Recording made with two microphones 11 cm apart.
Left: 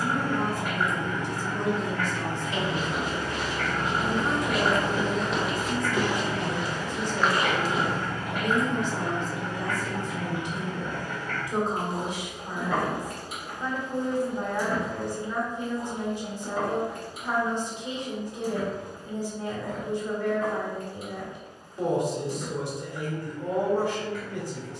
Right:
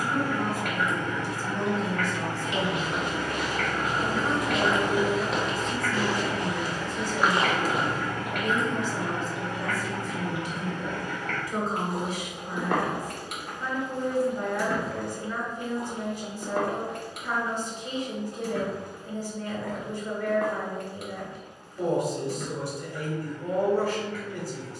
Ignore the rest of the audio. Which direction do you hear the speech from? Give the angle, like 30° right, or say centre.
20° left.